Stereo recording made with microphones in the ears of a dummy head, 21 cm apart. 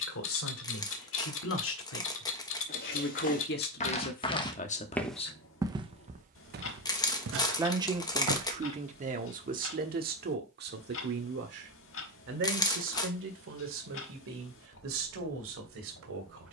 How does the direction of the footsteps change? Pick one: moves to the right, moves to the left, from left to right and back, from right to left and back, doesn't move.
moves to the right.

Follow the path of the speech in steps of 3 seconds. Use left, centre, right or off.
left, left, right, right, right, right.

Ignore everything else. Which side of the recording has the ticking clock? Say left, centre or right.
left.